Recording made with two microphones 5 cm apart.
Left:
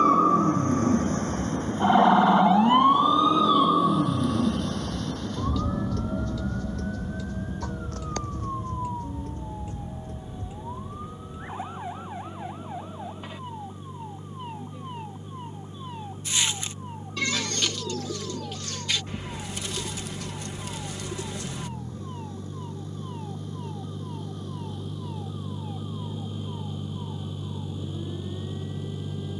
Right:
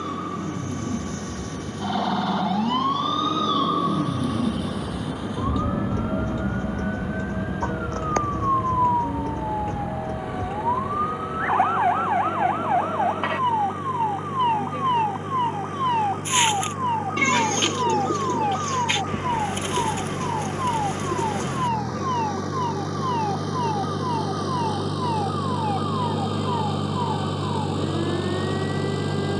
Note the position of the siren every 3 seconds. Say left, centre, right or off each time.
left, centre, right, right, right, right, right, right, right, right.